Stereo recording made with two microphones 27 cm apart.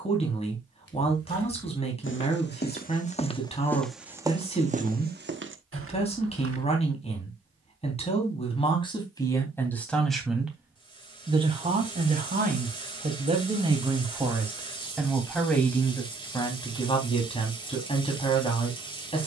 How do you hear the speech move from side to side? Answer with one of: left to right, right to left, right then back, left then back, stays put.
right then back.